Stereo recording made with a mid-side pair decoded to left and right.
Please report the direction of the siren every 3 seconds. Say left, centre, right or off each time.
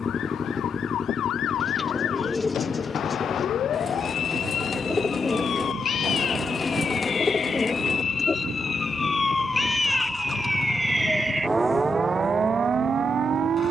left, left, left, centre, right.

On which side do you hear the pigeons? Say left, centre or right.
left.